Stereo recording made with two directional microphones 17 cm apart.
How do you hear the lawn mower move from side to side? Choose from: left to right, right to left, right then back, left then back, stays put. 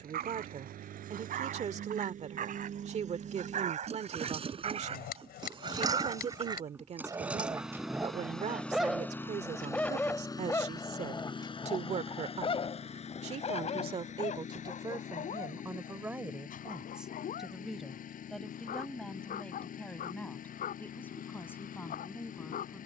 right to left.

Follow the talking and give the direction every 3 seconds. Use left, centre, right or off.
right, right, right, right, right, centre, centre, centre.